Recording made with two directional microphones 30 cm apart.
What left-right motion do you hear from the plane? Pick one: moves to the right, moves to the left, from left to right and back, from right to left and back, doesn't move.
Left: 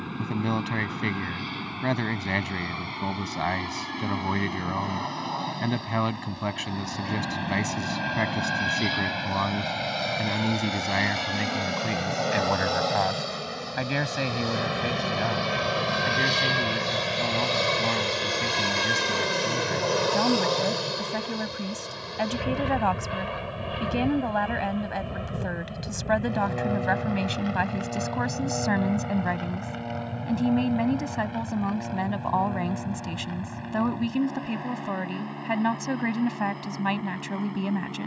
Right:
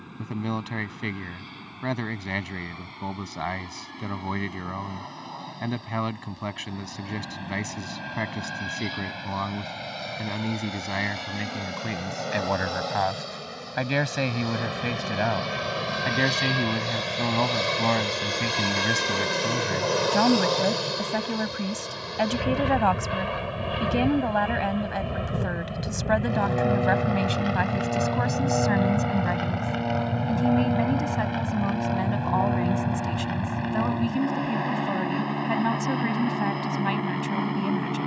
moves to the right.